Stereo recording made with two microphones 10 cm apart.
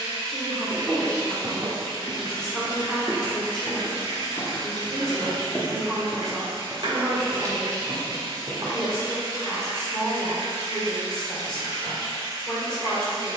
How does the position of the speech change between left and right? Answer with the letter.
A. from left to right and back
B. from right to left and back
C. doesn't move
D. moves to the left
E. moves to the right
C.